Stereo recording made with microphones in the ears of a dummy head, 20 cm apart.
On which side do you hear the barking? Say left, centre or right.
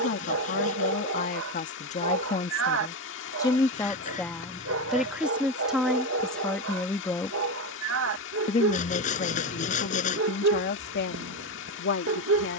right.